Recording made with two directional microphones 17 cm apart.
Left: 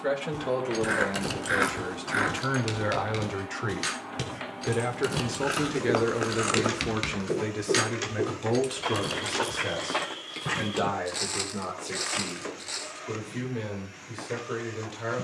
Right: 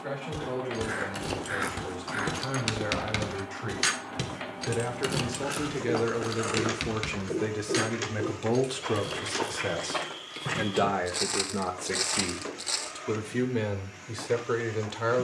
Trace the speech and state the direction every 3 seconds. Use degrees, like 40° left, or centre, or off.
50° left, 30° left, centre, 20° right, 40° right.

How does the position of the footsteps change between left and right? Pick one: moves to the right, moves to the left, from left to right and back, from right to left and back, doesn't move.
from right to left and back.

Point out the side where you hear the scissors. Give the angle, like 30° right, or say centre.
40° left.